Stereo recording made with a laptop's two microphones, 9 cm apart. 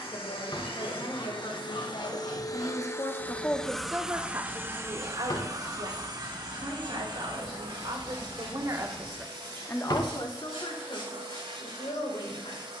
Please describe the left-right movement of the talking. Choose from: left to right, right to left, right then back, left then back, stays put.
right then back.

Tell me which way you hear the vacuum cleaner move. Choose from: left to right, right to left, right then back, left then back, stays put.
left to right.